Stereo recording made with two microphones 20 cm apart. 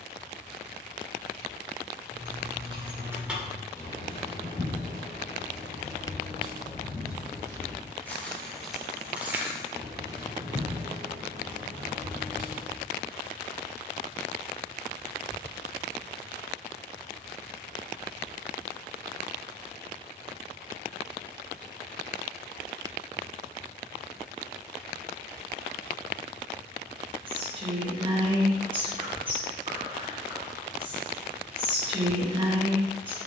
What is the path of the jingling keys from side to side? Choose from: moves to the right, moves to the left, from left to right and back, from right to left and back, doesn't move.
from right to left and back.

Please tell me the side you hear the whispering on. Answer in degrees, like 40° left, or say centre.
30° right.